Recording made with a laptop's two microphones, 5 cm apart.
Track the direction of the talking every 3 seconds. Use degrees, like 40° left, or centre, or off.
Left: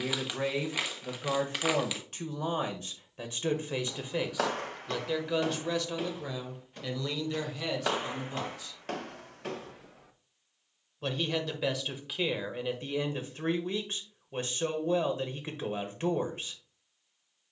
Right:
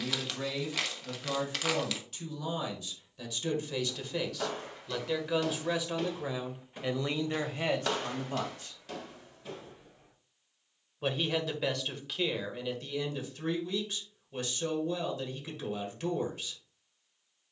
40° left, 10° left, 30° right, centre, 30° left, 30° left.